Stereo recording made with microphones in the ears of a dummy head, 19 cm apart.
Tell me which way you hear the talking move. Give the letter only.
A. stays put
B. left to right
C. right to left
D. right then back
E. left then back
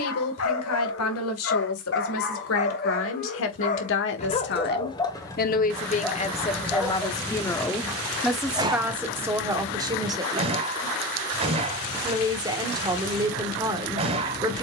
B.